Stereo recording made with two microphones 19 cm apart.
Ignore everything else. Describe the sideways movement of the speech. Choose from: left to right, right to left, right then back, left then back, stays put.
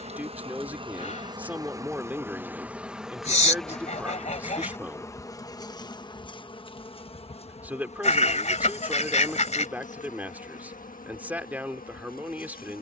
stays put.